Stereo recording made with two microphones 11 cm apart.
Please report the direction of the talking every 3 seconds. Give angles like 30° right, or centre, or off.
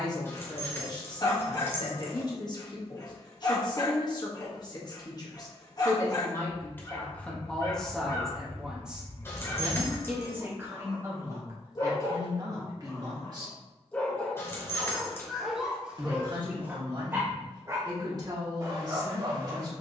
40° left, 40° left, 10° left, 20° right, 30° right, 40° right, 40° right.